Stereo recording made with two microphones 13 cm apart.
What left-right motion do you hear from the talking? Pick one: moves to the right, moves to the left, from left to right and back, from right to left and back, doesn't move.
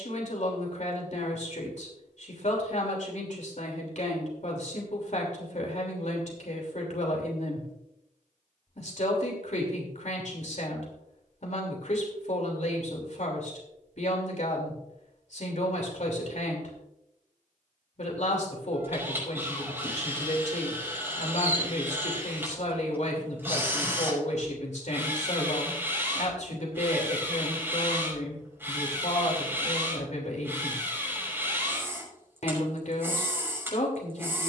doesn't move.